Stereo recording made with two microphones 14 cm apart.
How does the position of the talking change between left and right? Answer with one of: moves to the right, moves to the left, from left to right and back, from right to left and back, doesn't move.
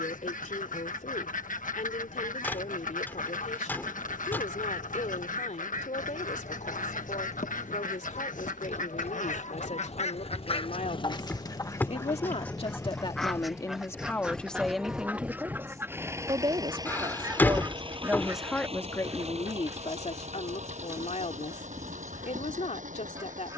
from left to right and back.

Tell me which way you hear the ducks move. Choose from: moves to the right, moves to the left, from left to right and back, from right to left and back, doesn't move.
moves to the right.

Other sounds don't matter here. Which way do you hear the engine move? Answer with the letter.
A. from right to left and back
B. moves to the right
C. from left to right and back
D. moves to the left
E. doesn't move
B.